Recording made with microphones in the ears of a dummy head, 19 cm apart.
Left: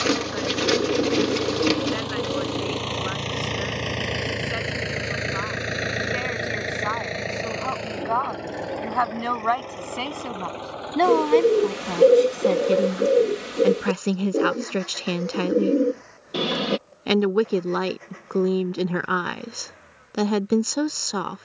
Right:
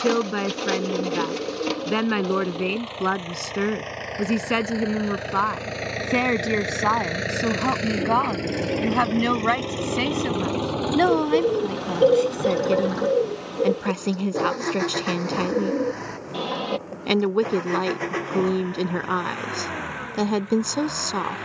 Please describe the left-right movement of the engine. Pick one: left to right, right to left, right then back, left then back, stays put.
left to right.